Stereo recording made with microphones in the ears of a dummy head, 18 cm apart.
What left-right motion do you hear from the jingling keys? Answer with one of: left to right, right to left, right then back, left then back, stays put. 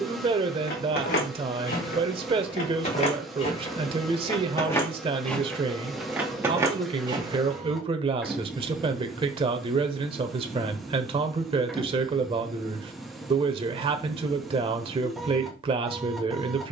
left to right.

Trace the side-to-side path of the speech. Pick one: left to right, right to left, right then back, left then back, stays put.
stays put.